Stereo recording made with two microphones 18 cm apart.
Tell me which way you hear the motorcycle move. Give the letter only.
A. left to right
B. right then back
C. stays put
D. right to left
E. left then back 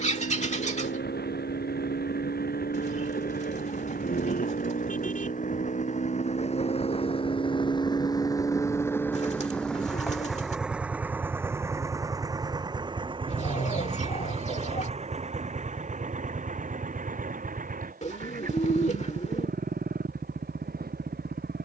A.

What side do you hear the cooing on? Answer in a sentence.
In this clip you hear the cooing on the left.